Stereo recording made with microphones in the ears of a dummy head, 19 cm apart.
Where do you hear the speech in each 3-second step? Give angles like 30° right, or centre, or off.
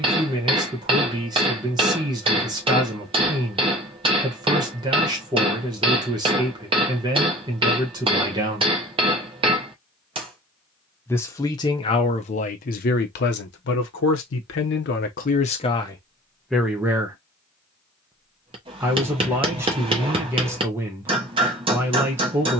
20° right, 20° right, 20° right, 20° left, 50° left, 10° left, 10° right, 10° right.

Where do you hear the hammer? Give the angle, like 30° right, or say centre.
20° right.